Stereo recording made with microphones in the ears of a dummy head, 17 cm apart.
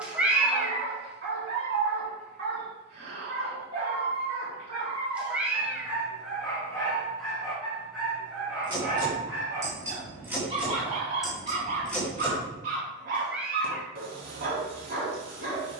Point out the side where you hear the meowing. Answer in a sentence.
In this clip you hear the meowing in the centre.